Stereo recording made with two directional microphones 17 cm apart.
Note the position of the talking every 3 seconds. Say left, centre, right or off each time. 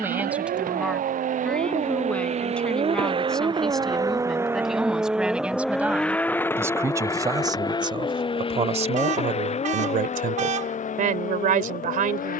centre, centre, right, right.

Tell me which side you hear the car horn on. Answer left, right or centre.
right.